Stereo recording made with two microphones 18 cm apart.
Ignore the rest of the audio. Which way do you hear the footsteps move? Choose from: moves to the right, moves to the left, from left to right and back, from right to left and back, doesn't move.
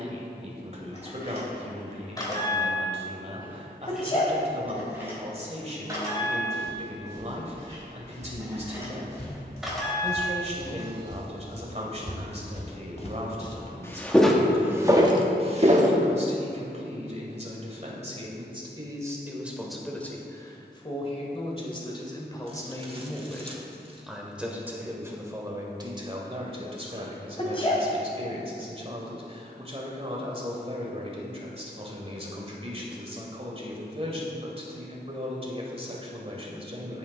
moves to the right.